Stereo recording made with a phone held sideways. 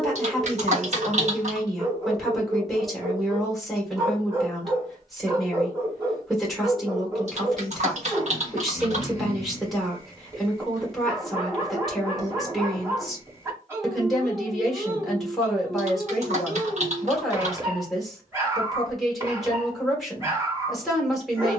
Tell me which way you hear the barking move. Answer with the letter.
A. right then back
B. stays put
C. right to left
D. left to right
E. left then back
B.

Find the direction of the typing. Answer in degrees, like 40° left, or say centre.
50° right.